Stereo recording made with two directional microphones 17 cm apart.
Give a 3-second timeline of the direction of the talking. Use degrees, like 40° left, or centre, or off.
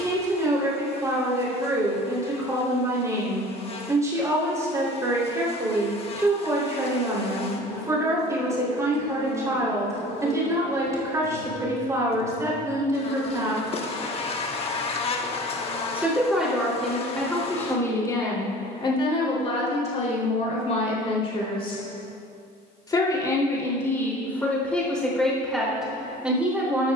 20° right, 20° right, 20° right, 20° right, 20° right, centre, 30° left, 20° left, centre.